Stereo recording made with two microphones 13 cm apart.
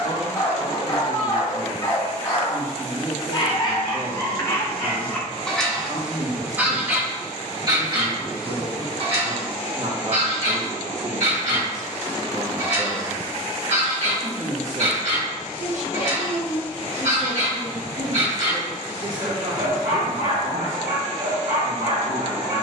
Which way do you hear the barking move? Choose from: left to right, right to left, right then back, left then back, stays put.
left to right.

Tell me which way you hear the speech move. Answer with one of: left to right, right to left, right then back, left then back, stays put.
stays put.